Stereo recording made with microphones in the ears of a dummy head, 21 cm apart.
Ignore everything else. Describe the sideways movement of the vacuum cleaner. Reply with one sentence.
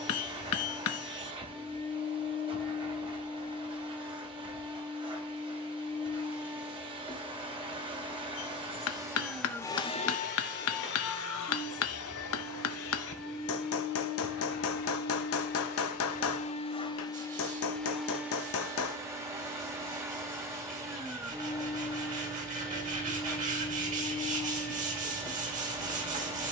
In this clip you hear the vacuum cleaner move from right to left and back again.